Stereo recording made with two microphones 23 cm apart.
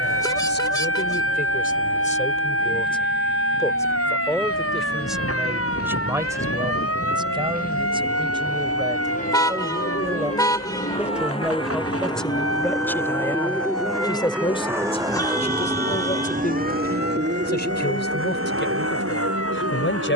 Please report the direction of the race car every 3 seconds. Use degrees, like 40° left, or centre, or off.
50° left, 50° left, 40° left, 30° left, centre, 40° right, 70° right.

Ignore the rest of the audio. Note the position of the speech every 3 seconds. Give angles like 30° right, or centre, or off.
40° left, centre, 20° right, 10° right, 10° left, 40° left, 50° left.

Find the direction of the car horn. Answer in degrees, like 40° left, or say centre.
20° left.